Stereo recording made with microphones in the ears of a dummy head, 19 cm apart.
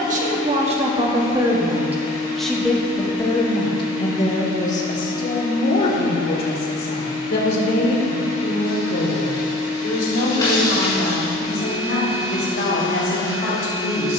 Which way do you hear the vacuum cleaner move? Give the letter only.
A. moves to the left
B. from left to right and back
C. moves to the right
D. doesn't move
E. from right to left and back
D.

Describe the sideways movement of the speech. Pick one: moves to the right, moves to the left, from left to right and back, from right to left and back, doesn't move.
moves to the left.